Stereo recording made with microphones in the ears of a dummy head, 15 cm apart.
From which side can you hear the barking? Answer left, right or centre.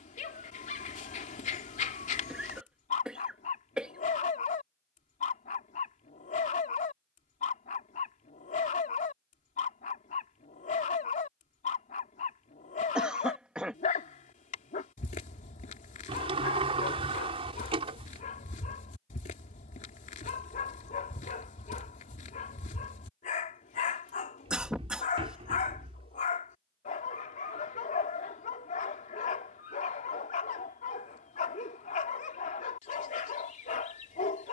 left.